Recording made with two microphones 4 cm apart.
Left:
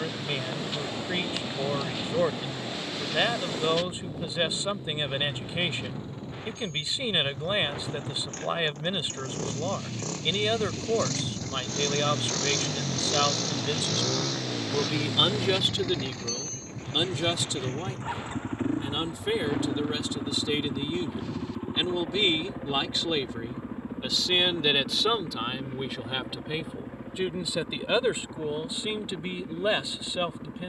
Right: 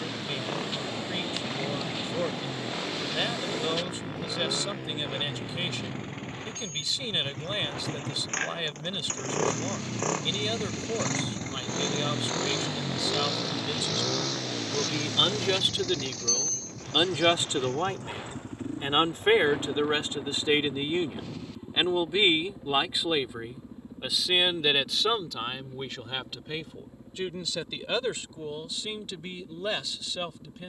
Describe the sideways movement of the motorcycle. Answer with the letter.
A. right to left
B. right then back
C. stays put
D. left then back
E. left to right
A.